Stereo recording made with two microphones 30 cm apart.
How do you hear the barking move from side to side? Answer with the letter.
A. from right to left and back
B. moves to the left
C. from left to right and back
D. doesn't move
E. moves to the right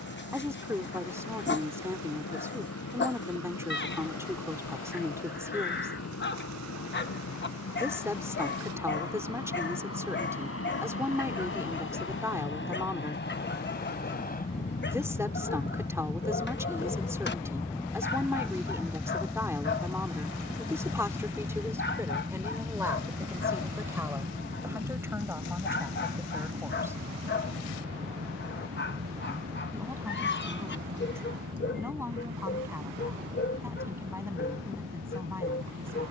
D.